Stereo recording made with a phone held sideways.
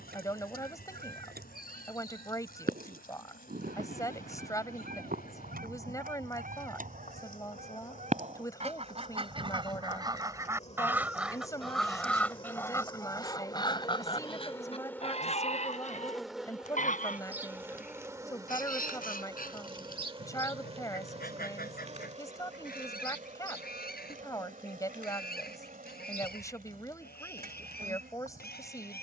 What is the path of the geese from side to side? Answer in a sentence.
You can hear the geese move to the left.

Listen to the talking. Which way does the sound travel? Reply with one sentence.
In this clip you hear the talking stay in one place.